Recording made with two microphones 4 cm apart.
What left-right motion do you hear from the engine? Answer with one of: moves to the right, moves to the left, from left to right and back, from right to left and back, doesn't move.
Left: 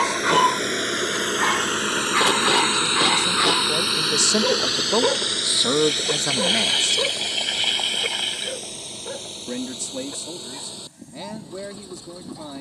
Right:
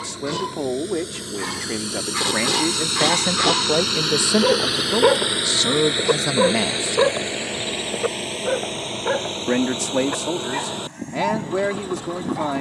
moves to the right.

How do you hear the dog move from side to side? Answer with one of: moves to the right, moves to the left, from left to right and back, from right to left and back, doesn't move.
moves to the right.